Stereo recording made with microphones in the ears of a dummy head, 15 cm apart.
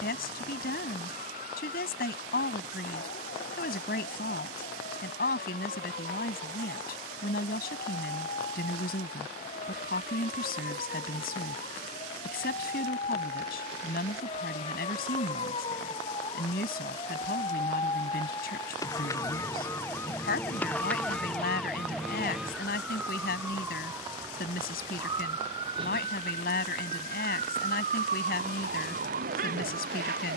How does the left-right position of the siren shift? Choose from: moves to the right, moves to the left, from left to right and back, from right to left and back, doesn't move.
moves to the right.